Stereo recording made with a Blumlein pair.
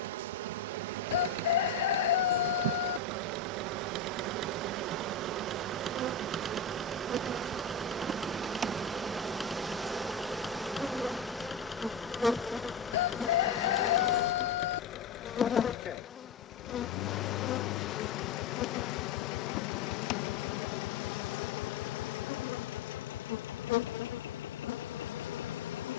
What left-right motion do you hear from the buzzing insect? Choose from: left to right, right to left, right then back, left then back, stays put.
right to left.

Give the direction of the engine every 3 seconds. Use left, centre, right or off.
right, right, centre, centre, left, left, left, left, left.